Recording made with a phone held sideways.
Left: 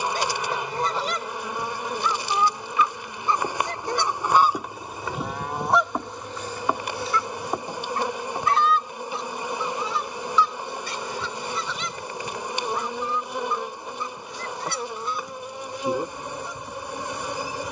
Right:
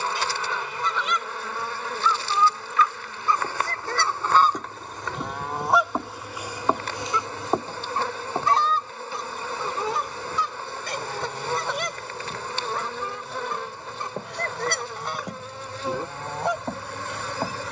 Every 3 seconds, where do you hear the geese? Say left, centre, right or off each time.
left, centre, right, right, right, right.